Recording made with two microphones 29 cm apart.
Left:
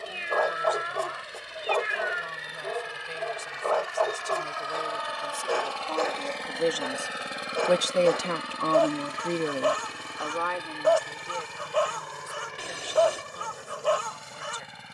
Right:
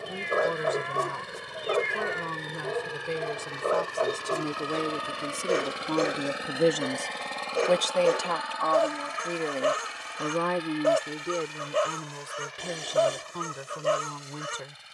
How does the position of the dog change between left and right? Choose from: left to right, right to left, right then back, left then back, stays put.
stays put.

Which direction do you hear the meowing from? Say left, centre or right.
centre.